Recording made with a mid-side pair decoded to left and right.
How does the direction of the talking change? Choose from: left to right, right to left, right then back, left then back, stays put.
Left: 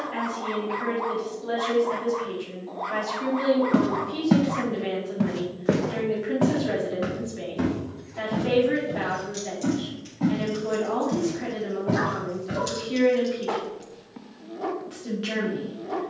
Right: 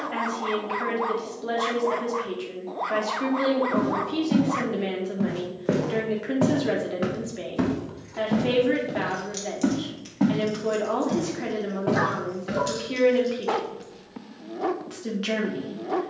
stays put.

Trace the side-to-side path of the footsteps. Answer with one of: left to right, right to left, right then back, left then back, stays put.
left to right.